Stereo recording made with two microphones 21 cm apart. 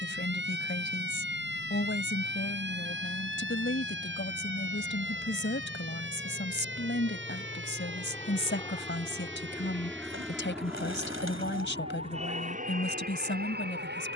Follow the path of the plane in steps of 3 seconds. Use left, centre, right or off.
left, left, left, centre, right.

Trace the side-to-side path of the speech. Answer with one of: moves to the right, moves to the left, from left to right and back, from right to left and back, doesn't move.
doesn't move.